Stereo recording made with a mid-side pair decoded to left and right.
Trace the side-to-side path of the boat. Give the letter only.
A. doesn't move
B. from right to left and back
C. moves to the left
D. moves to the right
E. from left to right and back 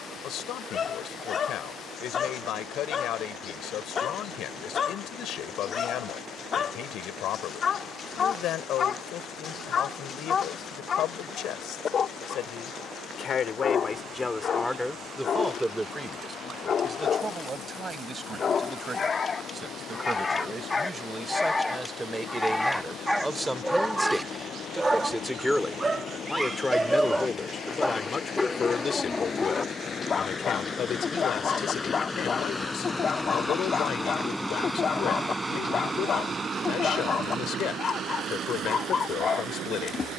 D.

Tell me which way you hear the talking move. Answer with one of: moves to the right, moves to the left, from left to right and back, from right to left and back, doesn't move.
from left to right and back.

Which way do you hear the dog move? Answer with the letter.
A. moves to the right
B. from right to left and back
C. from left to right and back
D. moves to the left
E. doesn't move
C.